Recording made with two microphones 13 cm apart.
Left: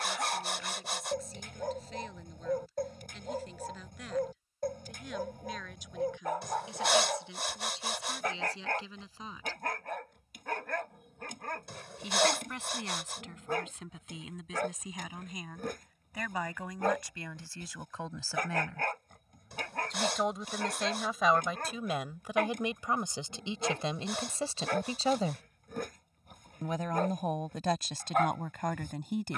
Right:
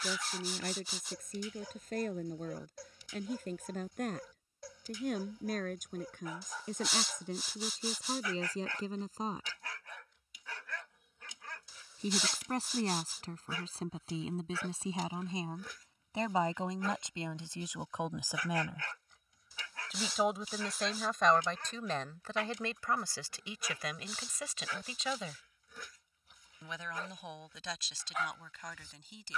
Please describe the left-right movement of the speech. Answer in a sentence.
You can hear the speech go from the right side to the left.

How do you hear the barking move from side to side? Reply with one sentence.
You can hear the barking stay put.